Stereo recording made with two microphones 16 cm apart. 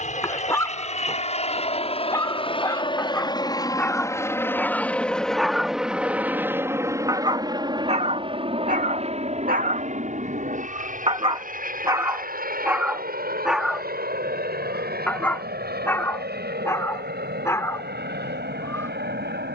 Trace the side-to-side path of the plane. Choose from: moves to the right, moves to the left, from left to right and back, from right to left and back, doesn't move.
moves to the right.